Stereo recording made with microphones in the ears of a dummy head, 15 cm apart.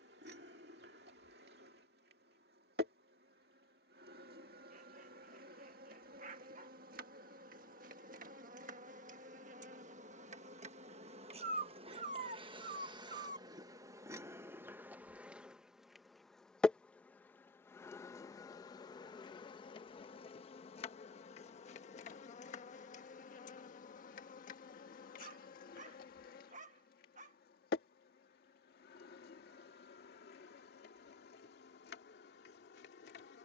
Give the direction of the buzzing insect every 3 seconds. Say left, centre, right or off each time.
right, right, right, right, right, centre, left, left, left, left, left.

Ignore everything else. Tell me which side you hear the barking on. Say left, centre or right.
right.